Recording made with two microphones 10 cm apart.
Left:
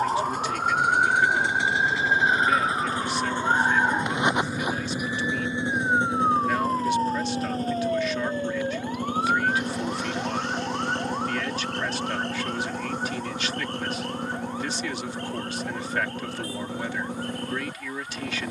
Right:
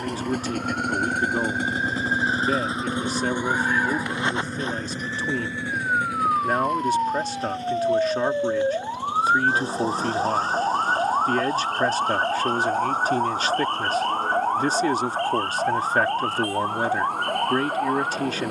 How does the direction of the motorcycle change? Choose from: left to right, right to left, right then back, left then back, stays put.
right to left.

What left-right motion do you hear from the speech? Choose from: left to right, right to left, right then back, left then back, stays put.
stays put.